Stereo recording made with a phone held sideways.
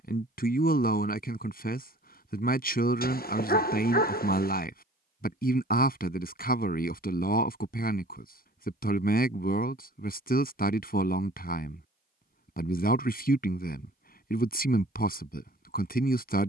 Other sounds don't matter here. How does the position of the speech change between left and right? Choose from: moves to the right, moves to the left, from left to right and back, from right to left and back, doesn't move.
doesn't move.